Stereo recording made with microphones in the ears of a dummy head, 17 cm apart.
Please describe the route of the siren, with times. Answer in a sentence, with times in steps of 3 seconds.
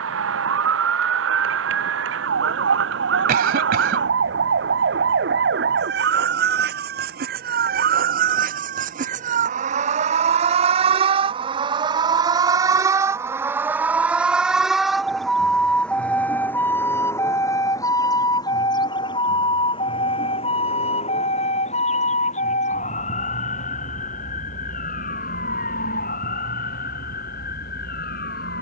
In this clip you hear the siren on the right from 0 s, in the centre from 12 s and on the left from 18 s.